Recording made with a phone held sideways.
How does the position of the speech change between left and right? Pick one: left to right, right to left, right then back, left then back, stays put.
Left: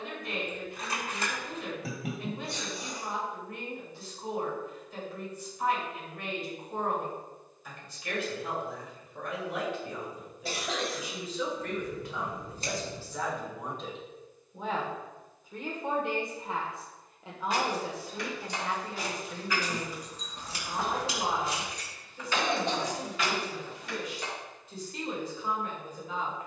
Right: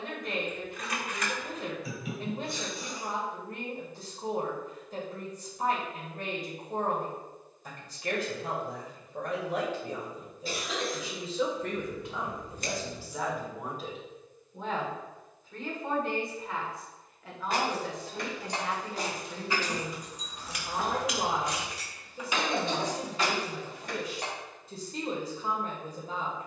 left then back.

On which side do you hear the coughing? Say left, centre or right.
left.